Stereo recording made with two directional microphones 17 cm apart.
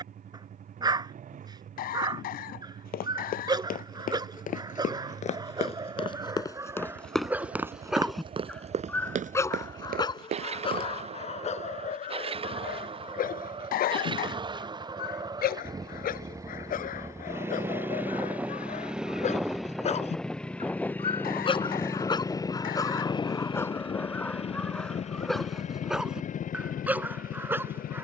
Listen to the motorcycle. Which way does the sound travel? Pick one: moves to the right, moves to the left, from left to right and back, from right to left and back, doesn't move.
moves to the left.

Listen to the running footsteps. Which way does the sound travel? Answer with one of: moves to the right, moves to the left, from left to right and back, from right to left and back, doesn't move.
moves to the right.